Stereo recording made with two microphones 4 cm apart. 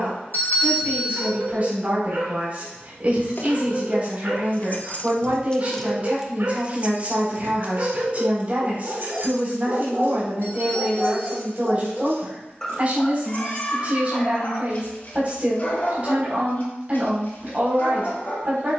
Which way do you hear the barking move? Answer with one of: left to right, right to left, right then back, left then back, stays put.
right to left.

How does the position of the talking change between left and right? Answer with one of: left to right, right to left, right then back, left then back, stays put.
stays put.